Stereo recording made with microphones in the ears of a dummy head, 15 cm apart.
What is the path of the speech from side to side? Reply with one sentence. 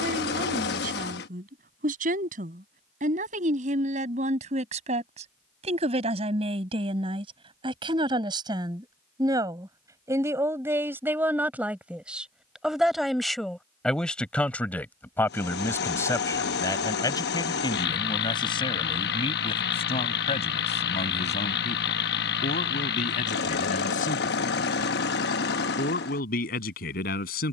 In this clip you hear the speech move to the left.